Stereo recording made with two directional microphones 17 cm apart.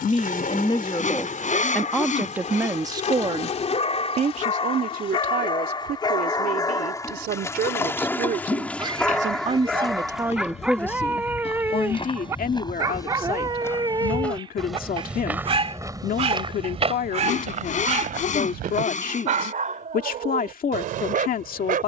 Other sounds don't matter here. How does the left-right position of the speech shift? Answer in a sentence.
You can hear the speech go right and come back.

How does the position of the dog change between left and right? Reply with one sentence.
You can hear the dog go from the left side to the right.